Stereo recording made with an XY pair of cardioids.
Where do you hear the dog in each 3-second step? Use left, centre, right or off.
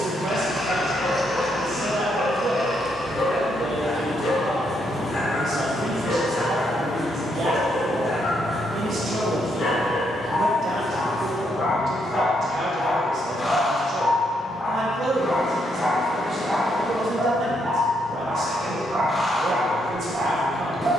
left, left, left, left, left, centre, right.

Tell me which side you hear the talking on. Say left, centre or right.
right.